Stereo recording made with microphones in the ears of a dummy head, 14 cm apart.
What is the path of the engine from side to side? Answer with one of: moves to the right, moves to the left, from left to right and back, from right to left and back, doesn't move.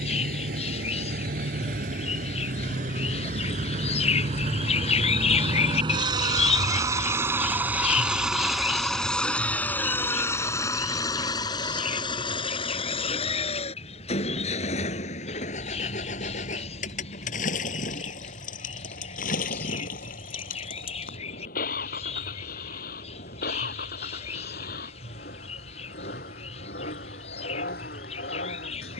moves to the left.